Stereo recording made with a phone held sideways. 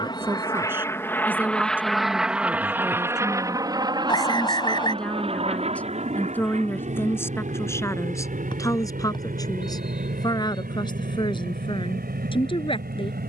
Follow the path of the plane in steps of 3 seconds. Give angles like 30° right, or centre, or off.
10° left, 30° right, 50° right, 60° right, 60° right.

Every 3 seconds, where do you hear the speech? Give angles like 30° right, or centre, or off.
10° right, centre, 20° left, 30° left, 30° left.